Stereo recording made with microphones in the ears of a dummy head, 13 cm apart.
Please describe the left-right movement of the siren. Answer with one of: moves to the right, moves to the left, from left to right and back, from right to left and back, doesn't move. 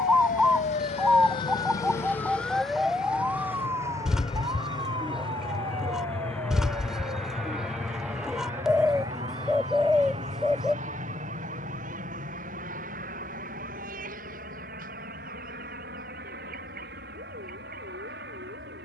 moves to the right.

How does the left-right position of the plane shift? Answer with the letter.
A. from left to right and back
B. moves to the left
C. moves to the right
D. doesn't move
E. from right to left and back
C.